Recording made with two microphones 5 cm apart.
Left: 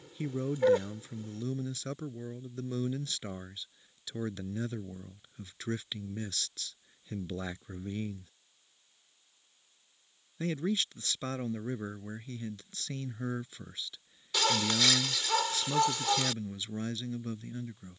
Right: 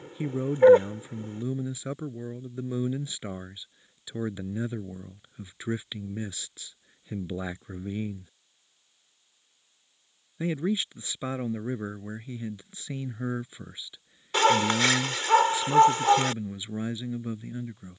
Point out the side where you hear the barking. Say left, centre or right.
right.